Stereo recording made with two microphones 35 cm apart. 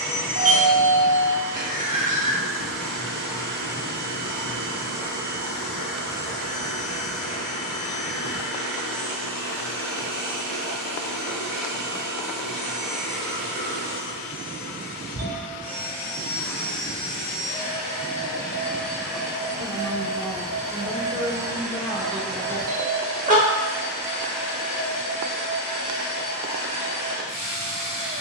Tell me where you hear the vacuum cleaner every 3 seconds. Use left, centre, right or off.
left, left, left, left, left, left, centre, centre, left, left.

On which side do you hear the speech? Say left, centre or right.
centre.